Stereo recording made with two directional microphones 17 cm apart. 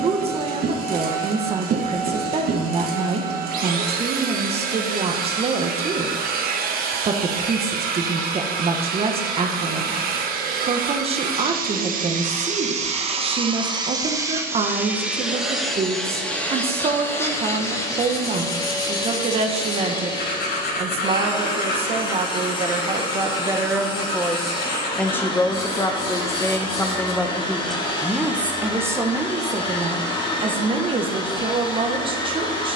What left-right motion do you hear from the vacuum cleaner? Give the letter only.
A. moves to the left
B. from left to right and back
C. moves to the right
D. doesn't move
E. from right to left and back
A.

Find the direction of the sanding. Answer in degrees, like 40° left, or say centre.
70° left.